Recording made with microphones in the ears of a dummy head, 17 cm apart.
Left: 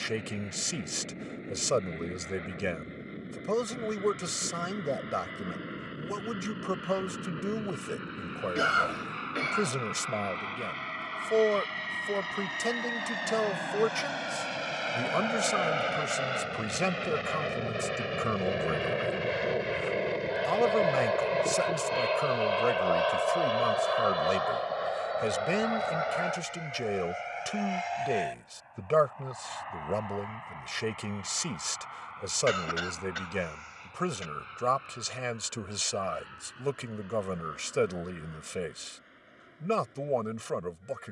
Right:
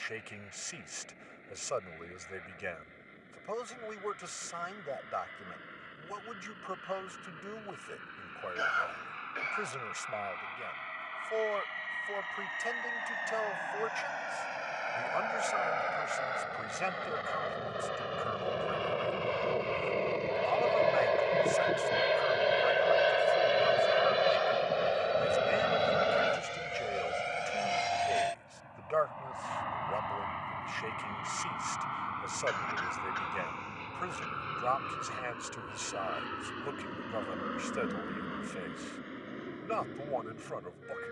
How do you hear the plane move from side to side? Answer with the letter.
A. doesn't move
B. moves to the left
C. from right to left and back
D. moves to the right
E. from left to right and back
D.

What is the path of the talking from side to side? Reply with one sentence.
In this clip you hear the talking stay put.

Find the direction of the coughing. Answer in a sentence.
In this clip you hear the coughing on the left.